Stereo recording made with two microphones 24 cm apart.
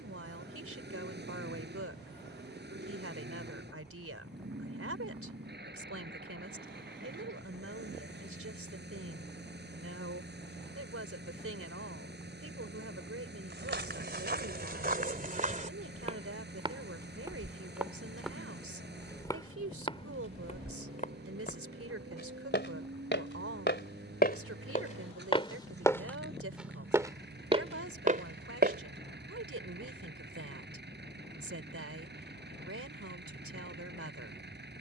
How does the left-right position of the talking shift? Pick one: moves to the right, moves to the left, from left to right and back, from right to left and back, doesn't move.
doesn't move.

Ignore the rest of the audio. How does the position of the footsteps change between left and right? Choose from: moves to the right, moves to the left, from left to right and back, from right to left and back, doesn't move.
from right to left and back.